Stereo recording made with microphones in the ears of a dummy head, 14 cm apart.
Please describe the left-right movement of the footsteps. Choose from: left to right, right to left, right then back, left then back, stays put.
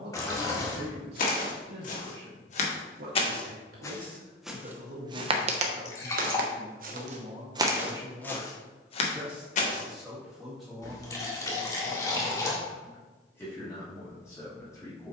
right then back.